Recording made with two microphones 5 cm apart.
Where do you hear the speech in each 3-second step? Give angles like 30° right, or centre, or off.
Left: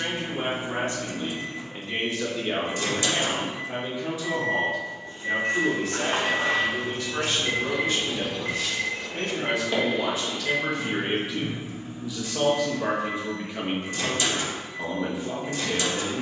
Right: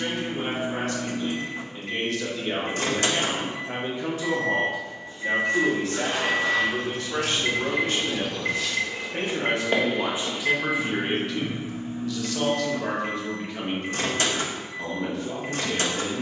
20° left, 50° right, 70° right, 20° right, 10° left, 10° left.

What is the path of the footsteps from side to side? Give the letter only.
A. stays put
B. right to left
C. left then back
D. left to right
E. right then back
D.